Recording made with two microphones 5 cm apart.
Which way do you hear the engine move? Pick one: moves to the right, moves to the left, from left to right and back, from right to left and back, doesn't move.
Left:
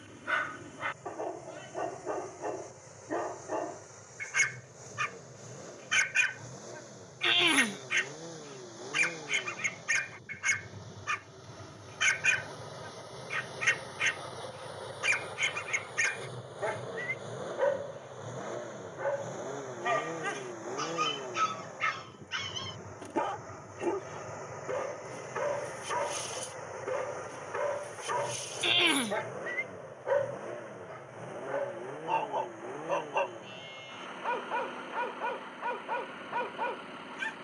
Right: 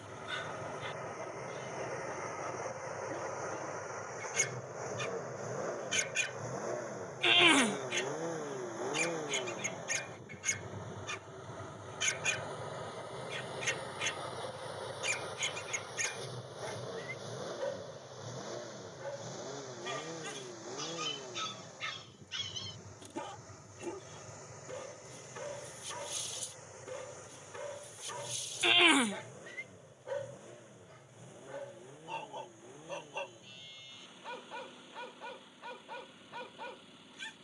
moves to the left.